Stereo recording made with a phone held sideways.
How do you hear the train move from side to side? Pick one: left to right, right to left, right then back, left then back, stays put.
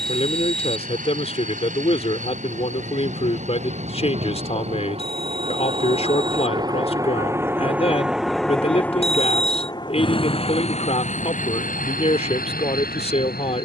right to left.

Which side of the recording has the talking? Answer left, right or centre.
left.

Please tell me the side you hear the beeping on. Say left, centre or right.
left.